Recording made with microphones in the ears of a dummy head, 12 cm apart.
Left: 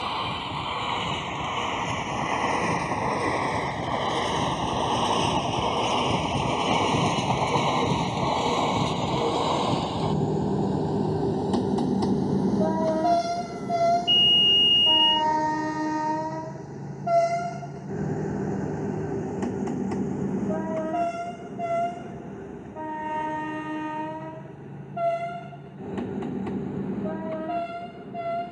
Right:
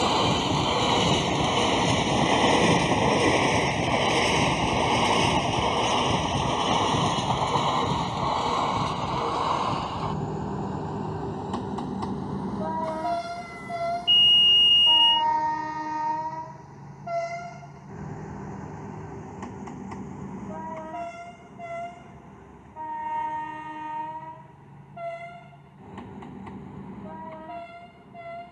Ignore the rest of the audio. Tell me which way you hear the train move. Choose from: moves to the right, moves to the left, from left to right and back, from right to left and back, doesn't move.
moves to the left.